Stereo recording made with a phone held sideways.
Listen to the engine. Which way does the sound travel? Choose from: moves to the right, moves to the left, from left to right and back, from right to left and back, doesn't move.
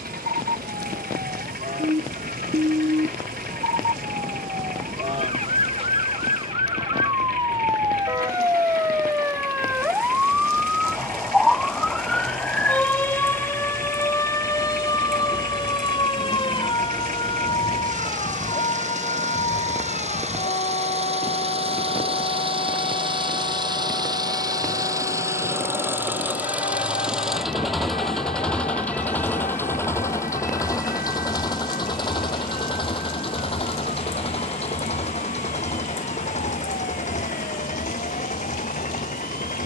moves to the left.